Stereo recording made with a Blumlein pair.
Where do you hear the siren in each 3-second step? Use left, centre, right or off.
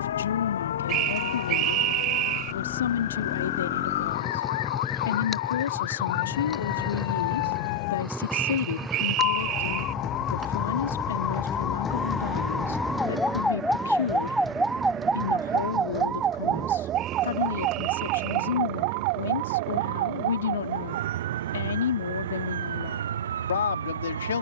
left, left, left, left, centre, right, right, right.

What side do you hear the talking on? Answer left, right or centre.
left.